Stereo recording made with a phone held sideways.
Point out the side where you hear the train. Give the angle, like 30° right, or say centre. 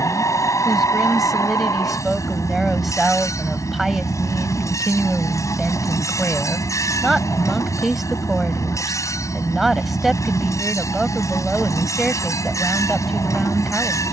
20° left.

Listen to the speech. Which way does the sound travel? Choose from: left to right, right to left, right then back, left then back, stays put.
stays put.